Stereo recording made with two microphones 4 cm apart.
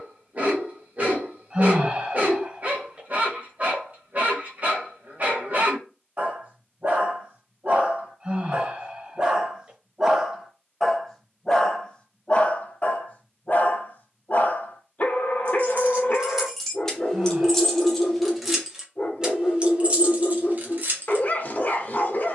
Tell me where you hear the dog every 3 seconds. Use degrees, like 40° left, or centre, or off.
40° right, 40° right, 40° right, centre, 40° left, 40° left, 40° left, 40° left.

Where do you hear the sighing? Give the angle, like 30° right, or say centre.
30° right.